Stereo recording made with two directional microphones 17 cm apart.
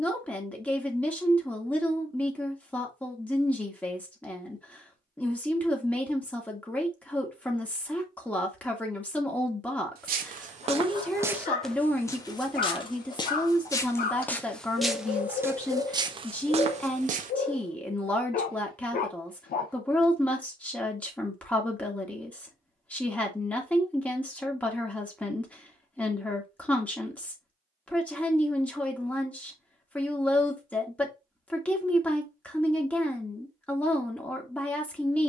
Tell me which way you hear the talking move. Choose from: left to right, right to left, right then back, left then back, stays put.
stays put.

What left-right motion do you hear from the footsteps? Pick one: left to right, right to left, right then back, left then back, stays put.
left then back.